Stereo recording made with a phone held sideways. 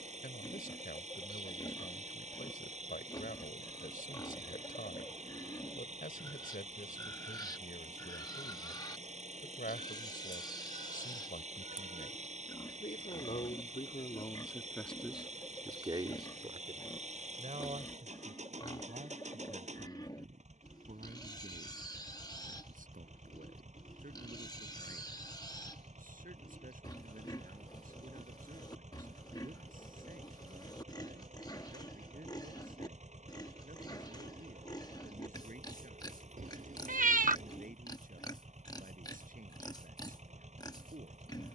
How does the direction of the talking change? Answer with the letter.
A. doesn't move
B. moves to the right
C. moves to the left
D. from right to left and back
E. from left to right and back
B.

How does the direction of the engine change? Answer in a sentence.
You can hear the engine stay in one place.